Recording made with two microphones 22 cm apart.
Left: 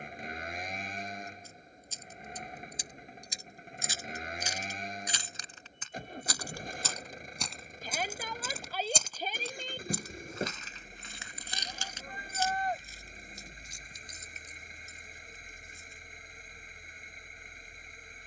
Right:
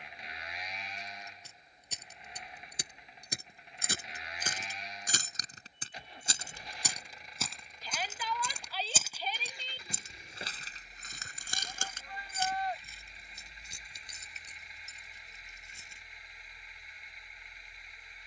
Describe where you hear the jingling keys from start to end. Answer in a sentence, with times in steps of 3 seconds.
You can hear the jingling keys on the right from 0 s, in the centre from 6 s and on the right from 9 s.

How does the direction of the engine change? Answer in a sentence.
In this clip you hear the engine stay in one place.